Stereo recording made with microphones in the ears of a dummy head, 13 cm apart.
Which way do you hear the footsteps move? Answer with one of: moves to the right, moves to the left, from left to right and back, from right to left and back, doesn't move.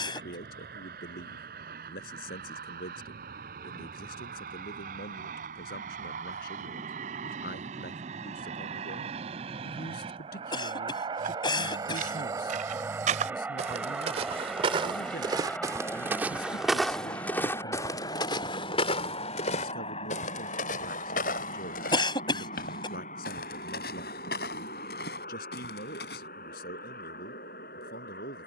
moves to the left.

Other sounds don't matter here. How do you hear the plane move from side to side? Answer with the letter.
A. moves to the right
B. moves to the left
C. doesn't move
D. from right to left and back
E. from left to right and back
B.